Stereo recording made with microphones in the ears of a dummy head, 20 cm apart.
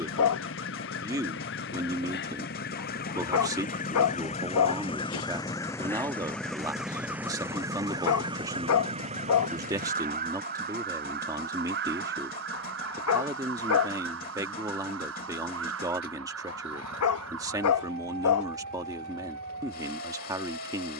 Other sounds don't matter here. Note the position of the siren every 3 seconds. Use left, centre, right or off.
left, left, centre, right, right, right, right.